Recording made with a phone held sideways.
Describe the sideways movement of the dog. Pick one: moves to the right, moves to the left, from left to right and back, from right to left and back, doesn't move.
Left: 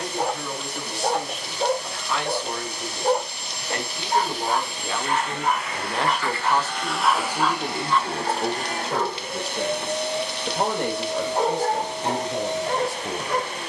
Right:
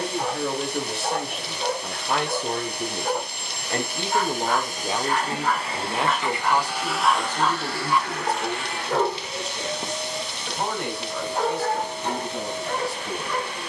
from left to right and back.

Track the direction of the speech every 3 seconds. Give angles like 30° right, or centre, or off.
50° right, 20° right, 20° left, 40° left, 50° left.